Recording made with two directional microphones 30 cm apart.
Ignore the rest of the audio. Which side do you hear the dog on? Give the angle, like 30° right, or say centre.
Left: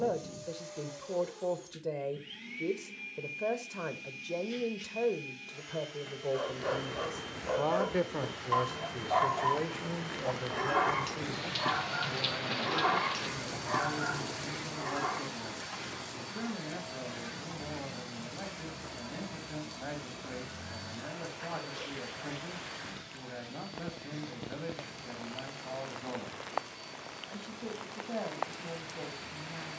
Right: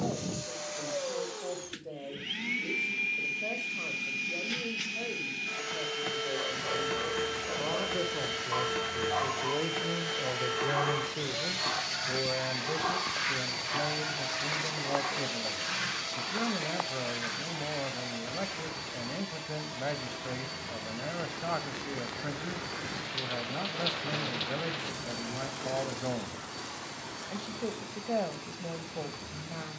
30° left.